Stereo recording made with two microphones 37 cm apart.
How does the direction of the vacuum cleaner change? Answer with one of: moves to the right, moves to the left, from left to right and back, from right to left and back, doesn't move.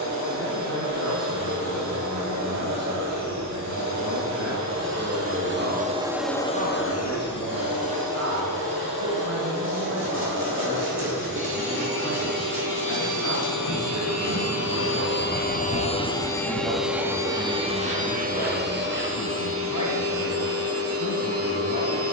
from right to left and back.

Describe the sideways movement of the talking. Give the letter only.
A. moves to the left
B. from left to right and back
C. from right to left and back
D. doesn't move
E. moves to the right
A.